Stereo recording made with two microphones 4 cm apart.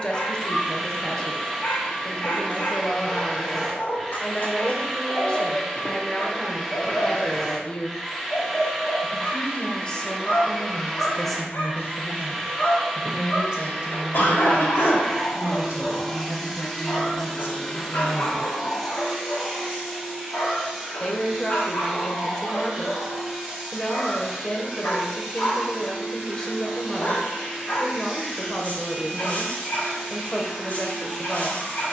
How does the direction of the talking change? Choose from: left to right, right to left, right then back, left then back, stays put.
right then back.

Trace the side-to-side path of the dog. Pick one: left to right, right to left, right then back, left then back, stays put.
stays put.